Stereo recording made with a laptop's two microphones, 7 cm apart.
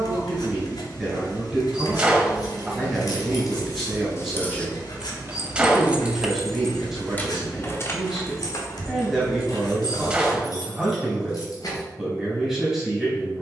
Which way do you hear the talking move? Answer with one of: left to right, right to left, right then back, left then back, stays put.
stays put.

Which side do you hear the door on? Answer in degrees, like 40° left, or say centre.
20° right.